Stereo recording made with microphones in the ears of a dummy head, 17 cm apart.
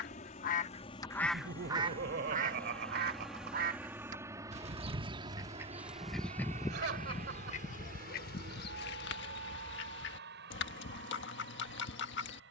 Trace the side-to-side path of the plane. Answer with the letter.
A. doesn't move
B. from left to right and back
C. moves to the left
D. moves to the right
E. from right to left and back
D.